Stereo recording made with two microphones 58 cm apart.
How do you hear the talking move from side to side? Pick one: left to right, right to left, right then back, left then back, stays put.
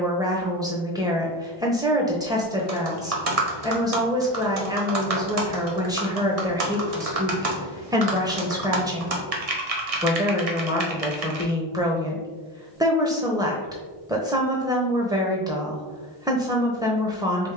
stays put.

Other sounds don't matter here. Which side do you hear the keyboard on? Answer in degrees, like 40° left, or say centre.
90° right.